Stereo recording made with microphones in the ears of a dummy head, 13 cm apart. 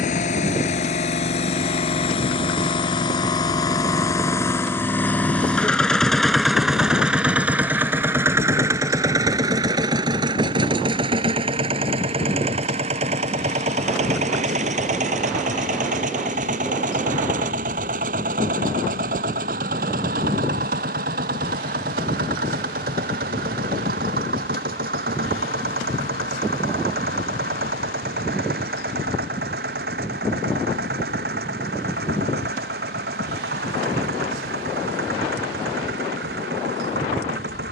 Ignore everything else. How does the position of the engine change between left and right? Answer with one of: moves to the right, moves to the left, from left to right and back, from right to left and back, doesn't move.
moves to the right.